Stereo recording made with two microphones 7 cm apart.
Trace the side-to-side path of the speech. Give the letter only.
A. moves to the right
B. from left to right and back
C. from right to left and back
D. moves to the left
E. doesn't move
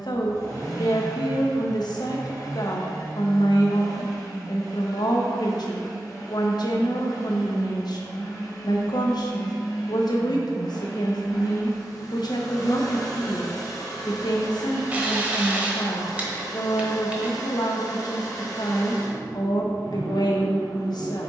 E.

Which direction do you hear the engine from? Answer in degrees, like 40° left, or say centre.
60° left.